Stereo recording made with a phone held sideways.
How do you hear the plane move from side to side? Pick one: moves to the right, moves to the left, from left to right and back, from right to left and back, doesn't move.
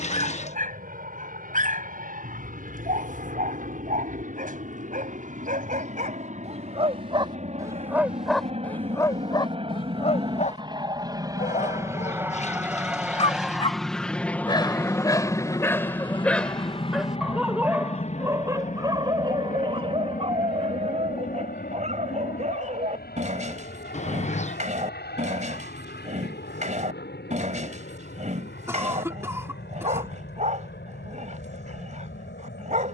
moves to the left.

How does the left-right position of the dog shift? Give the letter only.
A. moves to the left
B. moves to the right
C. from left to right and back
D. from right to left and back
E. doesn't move
D.